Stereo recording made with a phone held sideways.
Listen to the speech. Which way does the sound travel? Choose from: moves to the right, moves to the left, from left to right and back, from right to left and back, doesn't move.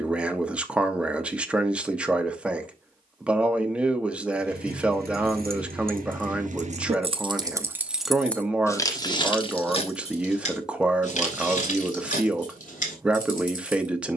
doesn't move.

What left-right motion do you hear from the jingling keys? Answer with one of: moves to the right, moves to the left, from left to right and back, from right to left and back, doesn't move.
moves to the left.